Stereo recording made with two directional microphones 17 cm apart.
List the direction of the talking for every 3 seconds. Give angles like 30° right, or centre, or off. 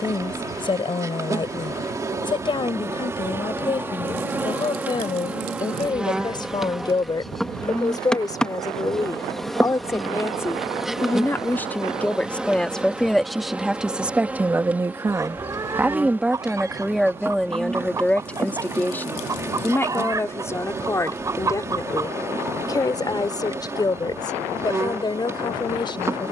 30° left, 30° left, 20° left, 10° left, centre, centre, 10° left, 20° left, 30° left.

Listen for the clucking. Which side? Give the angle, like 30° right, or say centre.
20° right.